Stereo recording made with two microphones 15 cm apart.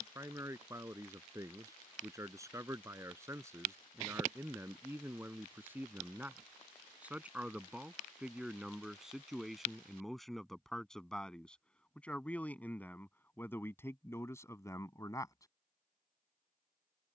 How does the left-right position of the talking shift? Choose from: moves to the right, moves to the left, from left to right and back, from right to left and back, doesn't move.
moves to the left.